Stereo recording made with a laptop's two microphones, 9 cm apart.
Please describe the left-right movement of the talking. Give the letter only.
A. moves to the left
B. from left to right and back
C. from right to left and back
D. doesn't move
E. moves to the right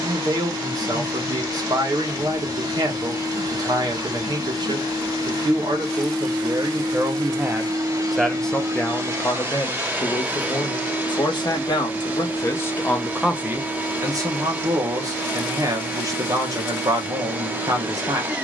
C.